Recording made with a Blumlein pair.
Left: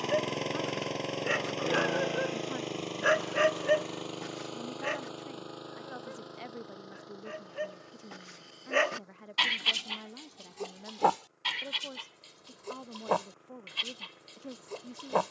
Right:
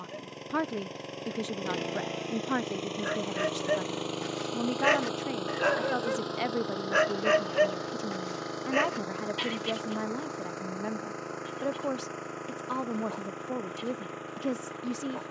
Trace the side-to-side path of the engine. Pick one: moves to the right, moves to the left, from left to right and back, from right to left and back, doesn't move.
moves to the right.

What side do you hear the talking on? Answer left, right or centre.
right.